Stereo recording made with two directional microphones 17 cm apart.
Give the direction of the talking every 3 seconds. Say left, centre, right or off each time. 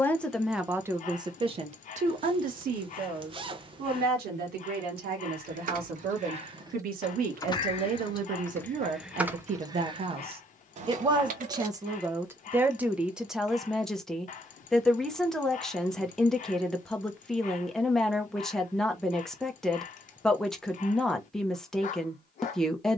right, right, right, right, centre, centre, centre, centre.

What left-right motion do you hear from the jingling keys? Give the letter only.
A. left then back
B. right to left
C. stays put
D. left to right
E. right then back
A.